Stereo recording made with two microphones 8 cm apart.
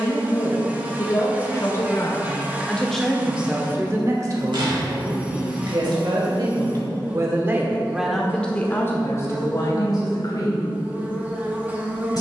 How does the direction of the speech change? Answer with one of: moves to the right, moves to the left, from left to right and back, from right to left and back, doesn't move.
from left to right and back.